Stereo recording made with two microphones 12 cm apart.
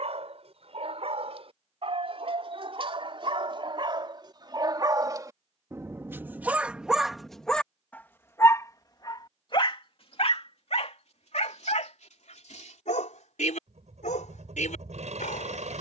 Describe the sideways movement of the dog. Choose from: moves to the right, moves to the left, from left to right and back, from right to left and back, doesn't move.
moves to the left.